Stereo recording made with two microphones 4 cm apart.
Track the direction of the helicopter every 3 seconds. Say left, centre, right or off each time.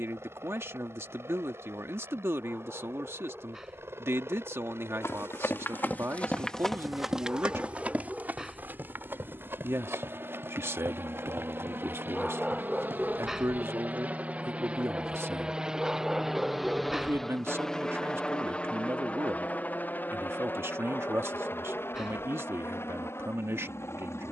right, right, right, right, right, centre, left, left.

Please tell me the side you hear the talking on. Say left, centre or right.
right.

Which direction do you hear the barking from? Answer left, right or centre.
centre.